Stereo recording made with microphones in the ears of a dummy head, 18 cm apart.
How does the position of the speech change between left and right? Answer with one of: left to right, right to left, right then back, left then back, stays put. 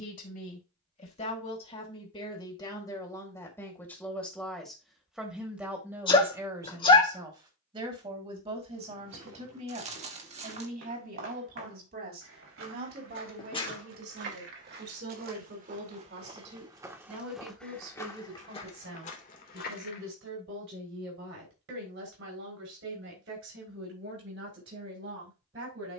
left to right.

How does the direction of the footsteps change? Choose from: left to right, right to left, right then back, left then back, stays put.
right to left.